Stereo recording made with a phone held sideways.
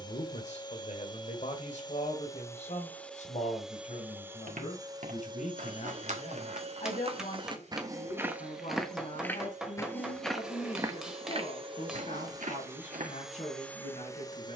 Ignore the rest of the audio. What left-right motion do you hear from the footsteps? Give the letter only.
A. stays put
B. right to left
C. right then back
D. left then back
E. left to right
D.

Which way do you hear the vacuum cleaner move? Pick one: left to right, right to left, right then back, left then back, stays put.
right then back.